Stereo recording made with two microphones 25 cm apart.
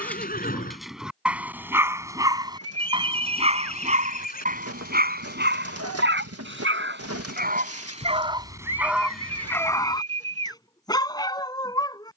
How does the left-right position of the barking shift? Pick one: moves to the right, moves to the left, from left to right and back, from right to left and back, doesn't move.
from left to right and back.